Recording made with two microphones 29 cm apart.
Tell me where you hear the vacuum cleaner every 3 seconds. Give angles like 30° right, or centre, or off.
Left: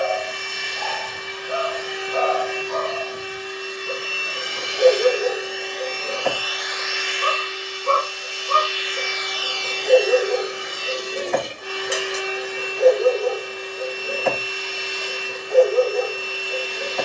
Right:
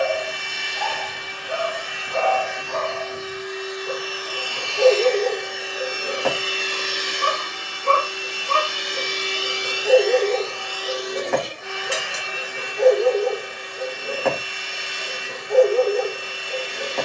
50° left, 20° left, 50° right, 10° left, 50° left, 50° left.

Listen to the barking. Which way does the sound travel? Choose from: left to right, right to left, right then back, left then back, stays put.
stays put.